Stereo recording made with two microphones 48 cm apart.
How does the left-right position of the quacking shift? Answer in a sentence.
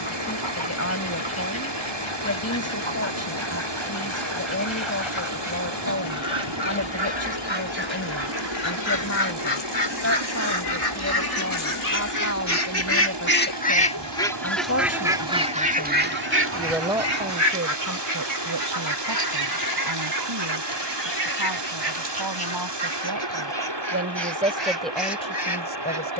In this clip you hear the quacking go from the left side to the right.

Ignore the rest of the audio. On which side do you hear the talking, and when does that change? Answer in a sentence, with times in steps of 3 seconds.
In this clip you hear the talking on the left from 0 s, in the centre from 15 s, on the right from 18 s and in the centre from 24 s.